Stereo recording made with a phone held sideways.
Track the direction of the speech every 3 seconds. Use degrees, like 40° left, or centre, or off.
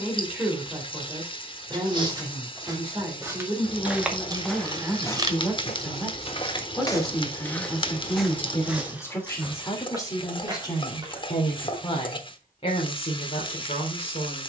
20° right, 10° right, 10° left, 20° left, 40° left.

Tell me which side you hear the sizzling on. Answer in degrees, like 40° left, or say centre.
30° left.